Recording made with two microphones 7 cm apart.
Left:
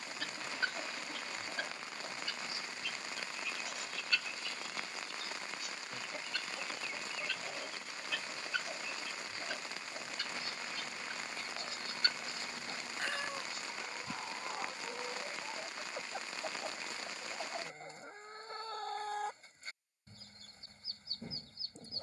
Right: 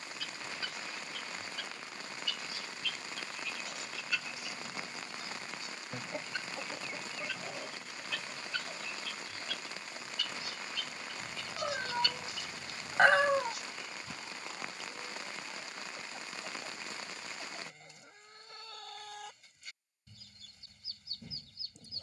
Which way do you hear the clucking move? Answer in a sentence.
You can hear the clucking move from left to right and back again.